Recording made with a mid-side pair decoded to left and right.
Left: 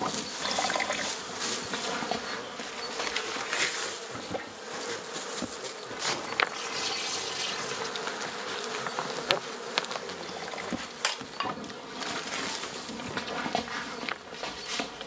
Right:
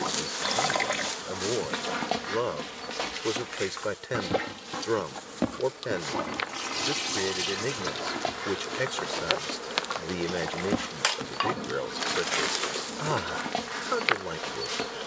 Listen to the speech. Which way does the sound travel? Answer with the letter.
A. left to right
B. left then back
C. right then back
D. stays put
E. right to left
D.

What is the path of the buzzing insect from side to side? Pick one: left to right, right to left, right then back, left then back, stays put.
left then back.